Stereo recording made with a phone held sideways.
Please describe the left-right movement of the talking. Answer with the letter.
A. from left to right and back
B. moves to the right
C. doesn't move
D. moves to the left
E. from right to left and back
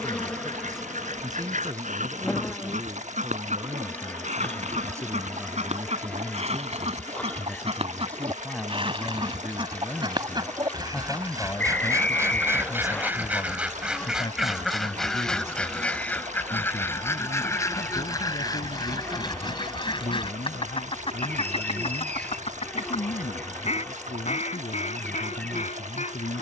D.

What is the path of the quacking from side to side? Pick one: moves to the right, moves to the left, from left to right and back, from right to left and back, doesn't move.
moves to the left.